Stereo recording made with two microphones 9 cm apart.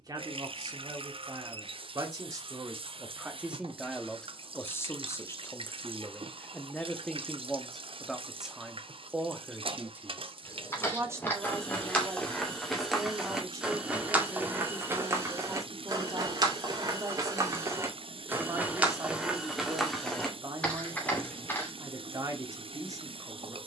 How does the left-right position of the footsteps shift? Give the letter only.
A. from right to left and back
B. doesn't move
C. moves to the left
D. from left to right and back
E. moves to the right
D.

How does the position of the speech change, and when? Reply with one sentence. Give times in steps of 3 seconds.
You can hear the speech on the right from 0 s, in the centre from 3 s and on the right from 9 s.